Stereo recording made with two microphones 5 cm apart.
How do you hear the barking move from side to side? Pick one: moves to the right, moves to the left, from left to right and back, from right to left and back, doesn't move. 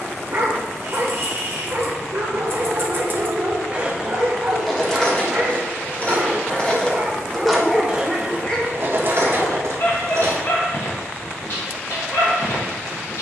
moves to the left.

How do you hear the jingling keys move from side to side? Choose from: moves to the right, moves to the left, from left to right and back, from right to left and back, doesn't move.
from right to left and back.